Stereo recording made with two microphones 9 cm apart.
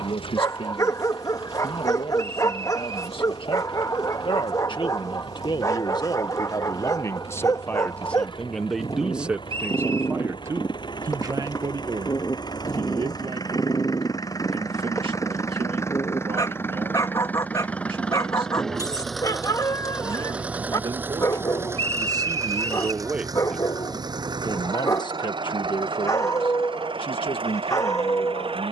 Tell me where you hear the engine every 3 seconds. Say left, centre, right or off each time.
left, left, left, left, left, left, centre, right, right, right.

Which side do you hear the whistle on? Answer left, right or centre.
right.